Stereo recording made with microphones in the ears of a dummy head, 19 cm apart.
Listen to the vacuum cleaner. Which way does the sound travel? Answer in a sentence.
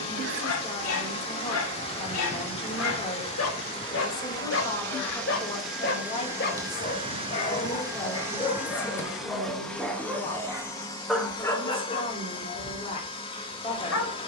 You can hear the vacuum cleaner move from left to right and back again.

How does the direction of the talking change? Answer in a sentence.
In this clip you hear the talking stay in one place.